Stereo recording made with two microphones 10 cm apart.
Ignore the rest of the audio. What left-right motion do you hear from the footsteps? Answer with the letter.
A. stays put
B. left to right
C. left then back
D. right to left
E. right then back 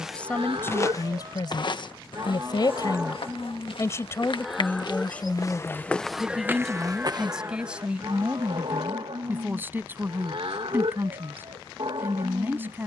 C.